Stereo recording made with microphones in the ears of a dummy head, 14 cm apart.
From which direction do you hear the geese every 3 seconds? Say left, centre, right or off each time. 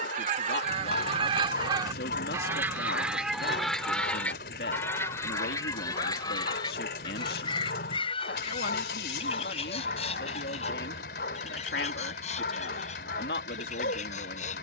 right, centre, left, left, left.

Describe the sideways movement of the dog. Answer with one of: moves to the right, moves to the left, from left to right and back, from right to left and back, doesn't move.
doesn't move.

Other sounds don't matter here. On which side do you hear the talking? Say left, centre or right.
left.